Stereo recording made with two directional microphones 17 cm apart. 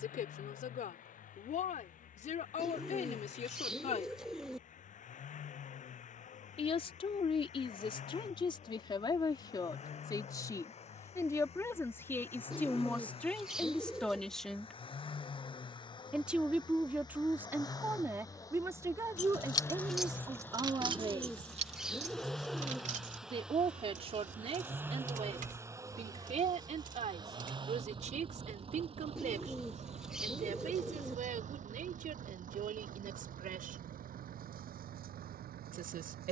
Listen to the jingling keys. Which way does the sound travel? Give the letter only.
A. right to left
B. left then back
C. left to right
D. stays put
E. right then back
C.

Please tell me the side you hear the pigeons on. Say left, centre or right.
centre.